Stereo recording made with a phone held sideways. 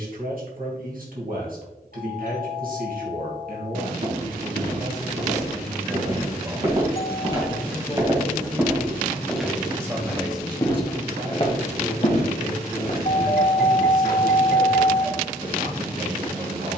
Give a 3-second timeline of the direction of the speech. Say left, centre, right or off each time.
right, right, centre, right, right, right.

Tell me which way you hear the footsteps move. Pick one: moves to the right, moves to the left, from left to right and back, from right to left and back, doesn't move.
moves to the left.